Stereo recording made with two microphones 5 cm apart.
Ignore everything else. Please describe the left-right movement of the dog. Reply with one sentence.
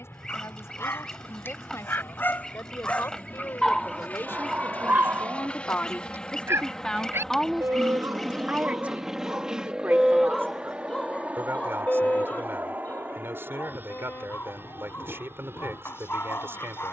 In this clip you hear the dog go right and come back.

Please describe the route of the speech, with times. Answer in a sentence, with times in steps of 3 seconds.
In this clip you hear the speech on the left from 0 s, in the centre from 6 s and on the right from 9 s.